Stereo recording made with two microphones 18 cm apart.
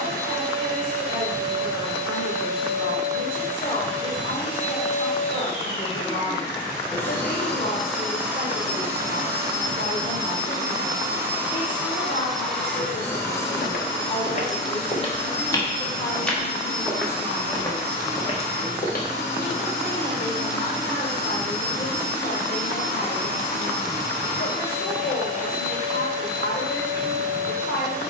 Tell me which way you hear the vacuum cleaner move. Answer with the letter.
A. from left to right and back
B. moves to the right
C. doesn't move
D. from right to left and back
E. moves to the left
A.